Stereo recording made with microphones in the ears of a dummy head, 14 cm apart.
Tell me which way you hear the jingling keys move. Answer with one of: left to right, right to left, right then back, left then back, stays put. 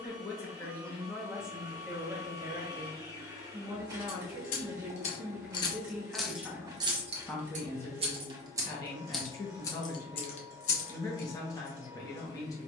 right then back.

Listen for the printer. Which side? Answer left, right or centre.
right.